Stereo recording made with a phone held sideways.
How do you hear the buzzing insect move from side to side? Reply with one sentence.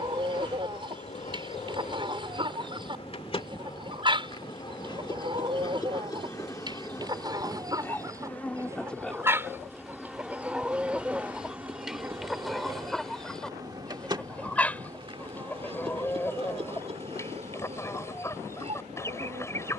In this clip you hear the buzzing insect travel towards the right.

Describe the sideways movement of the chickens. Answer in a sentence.
In this clip you hear the chickens move from right to left.